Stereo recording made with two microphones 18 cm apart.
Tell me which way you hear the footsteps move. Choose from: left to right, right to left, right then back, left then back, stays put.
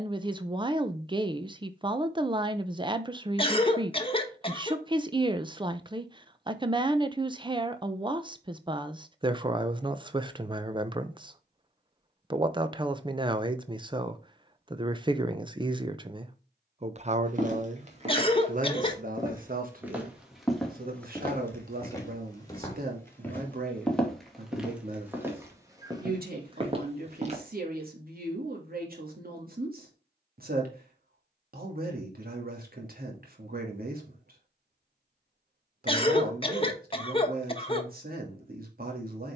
left then back.